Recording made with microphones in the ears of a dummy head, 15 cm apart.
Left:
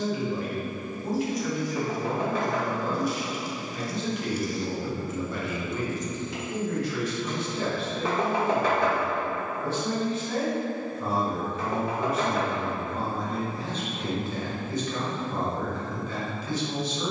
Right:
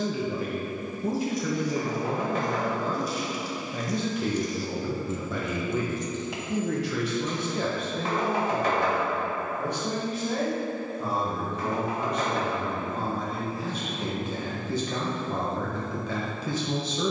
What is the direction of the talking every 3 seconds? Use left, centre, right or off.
right, right, right, centre, centre, right.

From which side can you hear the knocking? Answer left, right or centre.
left.